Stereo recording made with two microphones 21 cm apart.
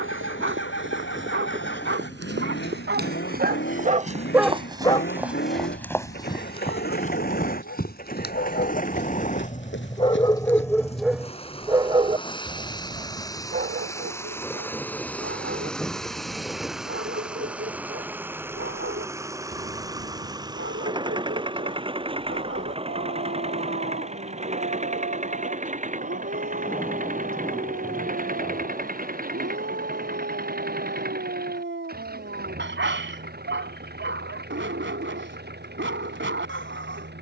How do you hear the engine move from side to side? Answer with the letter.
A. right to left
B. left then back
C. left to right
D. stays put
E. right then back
C.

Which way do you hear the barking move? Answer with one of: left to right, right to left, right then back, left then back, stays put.
left then back.